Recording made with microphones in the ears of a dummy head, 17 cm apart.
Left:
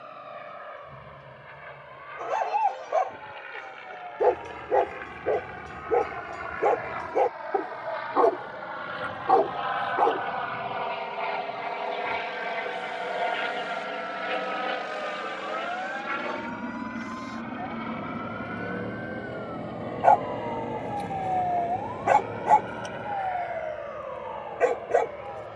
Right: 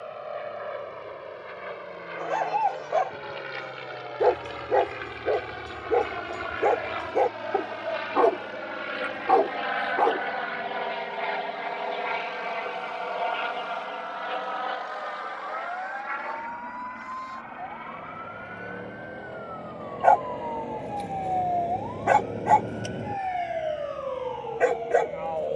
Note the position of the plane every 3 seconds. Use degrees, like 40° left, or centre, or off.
60° right, 50° right, 40° right, 20° right, 20° left, 40° left, 60° left, 70° left, 70° left.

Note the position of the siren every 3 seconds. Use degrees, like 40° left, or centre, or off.
50° left, 50° left, 50° left, 50° left, 40° left, 40° left, 20° left, 20° right, 60° right.